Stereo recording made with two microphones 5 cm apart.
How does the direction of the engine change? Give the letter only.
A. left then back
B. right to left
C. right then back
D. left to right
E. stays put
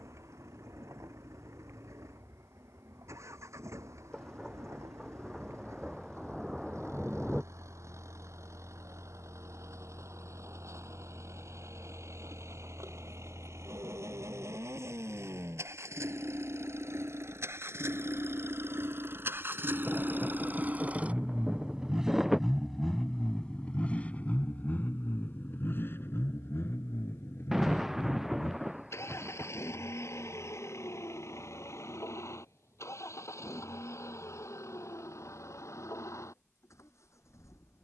B.